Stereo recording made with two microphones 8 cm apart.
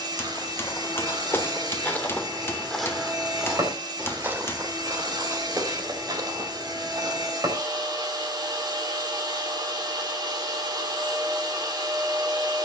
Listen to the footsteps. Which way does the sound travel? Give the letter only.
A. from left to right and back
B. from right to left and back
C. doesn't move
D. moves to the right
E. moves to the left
D.